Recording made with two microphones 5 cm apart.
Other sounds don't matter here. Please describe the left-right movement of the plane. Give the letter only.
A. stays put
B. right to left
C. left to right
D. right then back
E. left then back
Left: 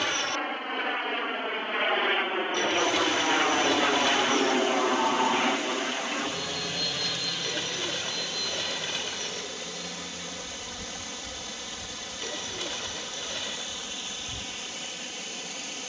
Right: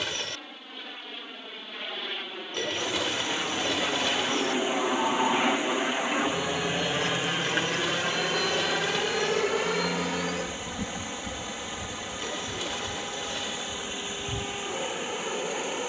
C.